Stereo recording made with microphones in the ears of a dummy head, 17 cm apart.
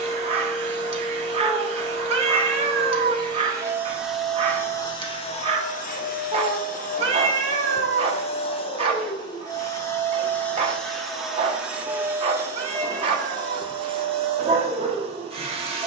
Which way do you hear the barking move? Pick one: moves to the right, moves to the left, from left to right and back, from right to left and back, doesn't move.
doesn't move.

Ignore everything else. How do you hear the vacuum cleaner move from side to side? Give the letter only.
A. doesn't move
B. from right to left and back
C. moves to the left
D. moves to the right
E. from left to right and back
B.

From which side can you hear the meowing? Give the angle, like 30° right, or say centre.
30° right.